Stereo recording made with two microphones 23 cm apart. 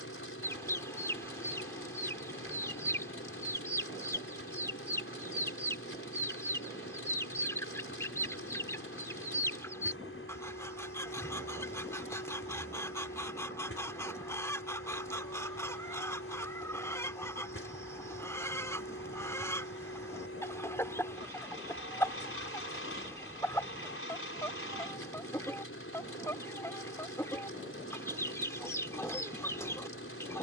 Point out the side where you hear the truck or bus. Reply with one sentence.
In this clip you hear the truck or bus on the left.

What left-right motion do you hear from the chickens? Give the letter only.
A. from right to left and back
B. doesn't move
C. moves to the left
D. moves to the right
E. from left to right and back
B.